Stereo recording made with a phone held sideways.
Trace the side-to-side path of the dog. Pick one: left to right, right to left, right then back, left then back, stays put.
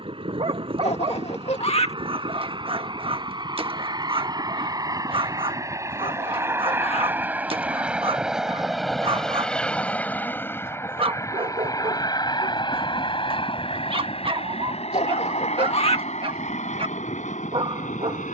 stays put.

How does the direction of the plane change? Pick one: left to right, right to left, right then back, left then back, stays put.
right to left.